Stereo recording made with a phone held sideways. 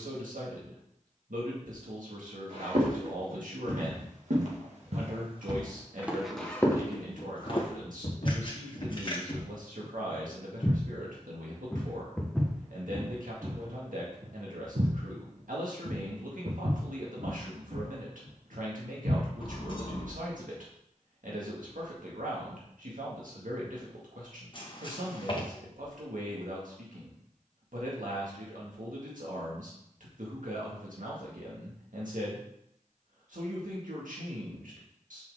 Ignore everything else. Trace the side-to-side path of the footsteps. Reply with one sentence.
In this clip you hear the footsteps move from right to left and back again.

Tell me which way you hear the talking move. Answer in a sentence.
In this clip you hear the talking stay put.